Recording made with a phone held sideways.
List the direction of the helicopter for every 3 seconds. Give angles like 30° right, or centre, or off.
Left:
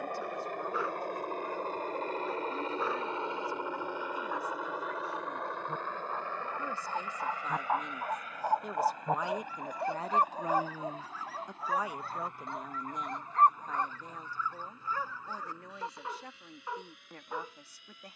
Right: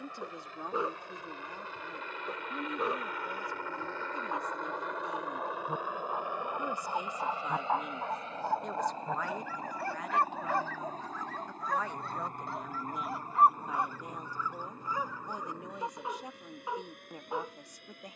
50° left, 10° left, 20° right, 40° right, 40° right, 50° right.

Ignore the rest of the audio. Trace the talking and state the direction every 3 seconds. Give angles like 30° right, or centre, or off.
20° right, 20° right, 10° right, 20° left, 10° right, 20° right.